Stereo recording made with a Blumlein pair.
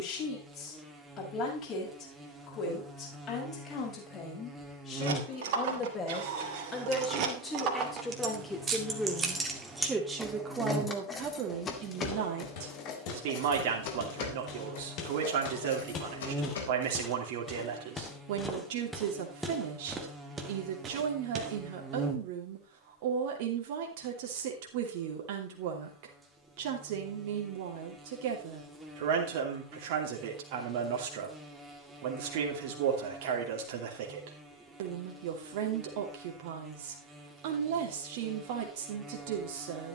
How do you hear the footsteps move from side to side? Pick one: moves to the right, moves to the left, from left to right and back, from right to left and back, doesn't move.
moves to the right.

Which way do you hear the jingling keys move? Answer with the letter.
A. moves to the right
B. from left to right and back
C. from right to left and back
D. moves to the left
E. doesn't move
D.